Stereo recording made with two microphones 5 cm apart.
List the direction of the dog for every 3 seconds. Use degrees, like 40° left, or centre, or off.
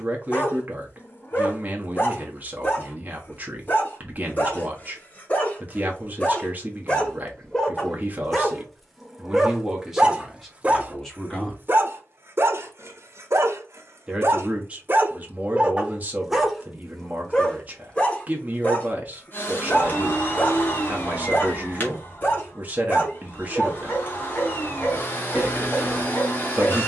40° left, 30° left, 10° left, 20° right, 50° right, 10° right, 30° left, 40° left, 40° left.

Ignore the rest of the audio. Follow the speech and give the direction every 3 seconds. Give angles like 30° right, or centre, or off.
30° right, 30° right, 30° right, centre, 20° right, 30° right, 30° right, 30° right, 30° right.